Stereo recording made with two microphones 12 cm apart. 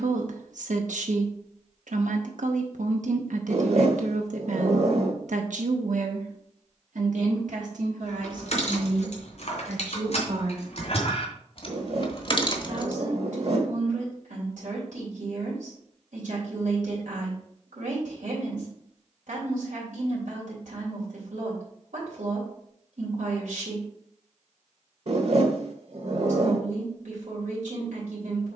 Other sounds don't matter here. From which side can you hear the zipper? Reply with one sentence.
In this clip you hear the zipper on the right.